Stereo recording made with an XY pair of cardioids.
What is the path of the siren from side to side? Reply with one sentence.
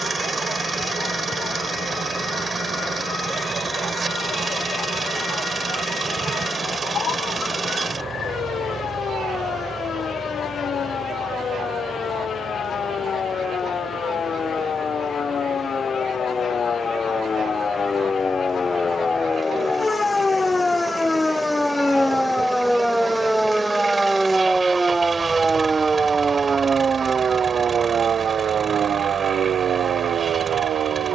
You can hear the siren move from left to right.